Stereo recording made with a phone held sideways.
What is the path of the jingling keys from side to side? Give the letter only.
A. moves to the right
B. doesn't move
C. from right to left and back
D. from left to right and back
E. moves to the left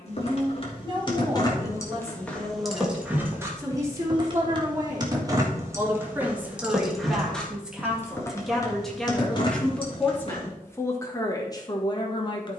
D.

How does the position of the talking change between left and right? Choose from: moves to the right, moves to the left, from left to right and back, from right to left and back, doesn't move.
moves to the left.